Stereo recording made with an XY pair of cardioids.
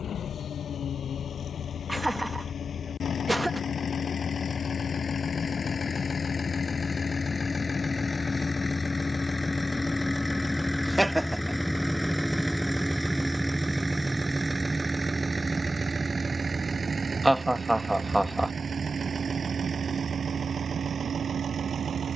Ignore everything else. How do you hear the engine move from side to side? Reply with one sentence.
You can hear the engine go from the left side to the right.